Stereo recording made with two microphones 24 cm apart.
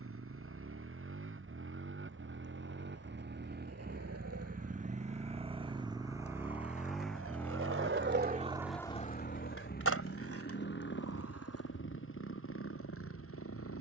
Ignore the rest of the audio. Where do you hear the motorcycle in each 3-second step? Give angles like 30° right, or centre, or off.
60° right, 30° right, 10° left, 40° left, 60° left.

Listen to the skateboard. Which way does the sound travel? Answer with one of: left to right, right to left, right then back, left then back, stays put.
right to left.